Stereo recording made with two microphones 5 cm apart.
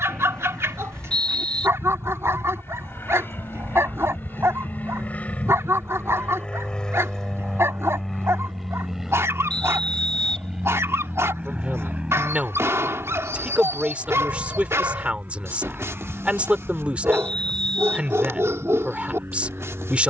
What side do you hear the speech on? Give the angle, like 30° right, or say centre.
30° right.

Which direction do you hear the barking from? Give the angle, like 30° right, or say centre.
70° right.